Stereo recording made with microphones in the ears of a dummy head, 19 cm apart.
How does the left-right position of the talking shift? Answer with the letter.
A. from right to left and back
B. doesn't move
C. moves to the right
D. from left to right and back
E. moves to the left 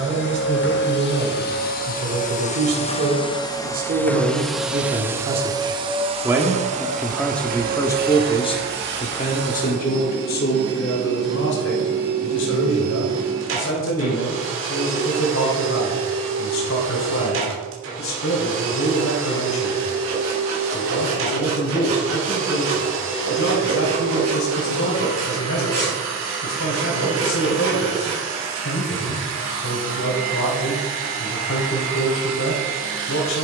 E.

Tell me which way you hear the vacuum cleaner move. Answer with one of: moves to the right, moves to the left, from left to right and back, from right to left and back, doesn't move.
moves to the right.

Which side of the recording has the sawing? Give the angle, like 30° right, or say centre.
80° right.